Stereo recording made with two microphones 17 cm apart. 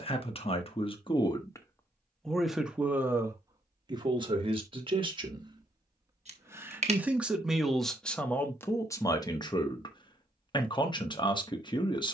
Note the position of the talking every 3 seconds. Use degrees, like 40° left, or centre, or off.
20° left, 30° right, centre, 30° left.